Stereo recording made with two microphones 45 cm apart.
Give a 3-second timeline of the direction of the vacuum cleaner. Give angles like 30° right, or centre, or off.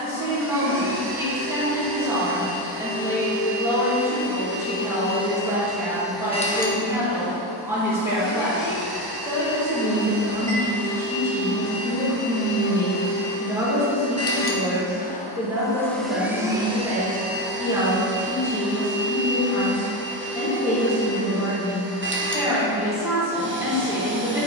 30° right, 20° right, 30° left, 60° left, 40° left, 10° right, 30° right, 30° right.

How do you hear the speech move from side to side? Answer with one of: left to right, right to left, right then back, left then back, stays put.
stays put.